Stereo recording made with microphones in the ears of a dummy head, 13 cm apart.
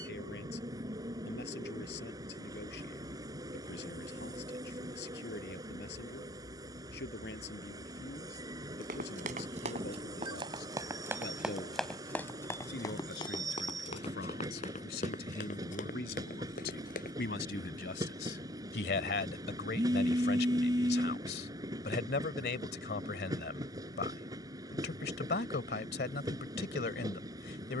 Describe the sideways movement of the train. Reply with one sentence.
In this clip you hear the train stay in one place.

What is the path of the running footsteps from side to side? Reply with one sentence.
In this clip you hear the running footsteps move to the left.